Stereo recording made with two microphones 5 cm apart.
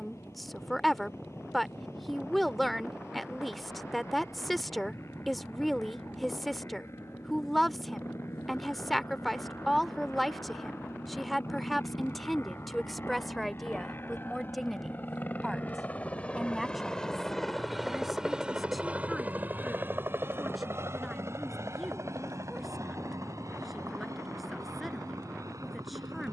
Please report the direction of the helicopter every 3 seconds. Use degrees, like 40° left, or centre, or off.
70° left, 70° left, 70° left, 60° left, 50° left, 20° left, 30° right, 60° right, 70° right.